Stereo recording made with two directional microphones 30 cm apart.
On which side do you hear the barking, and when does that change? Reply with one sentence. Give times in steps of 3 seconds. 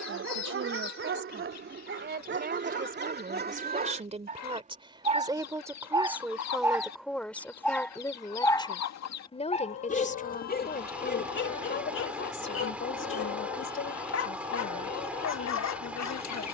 You can hear the barking on the right from 0 s, in the centre from 6 s and on the left from 9 s.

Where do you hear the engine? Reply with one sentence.
In this clip you hear the engine in the centre.